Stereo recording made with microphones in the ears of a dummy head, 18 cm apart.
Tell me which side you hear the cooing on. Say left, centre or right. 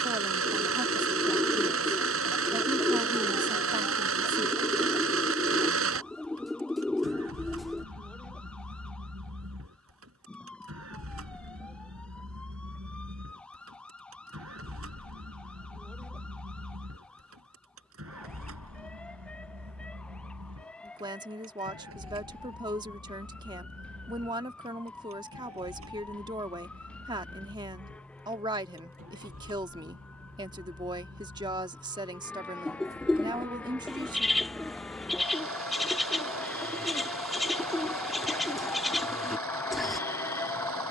centre.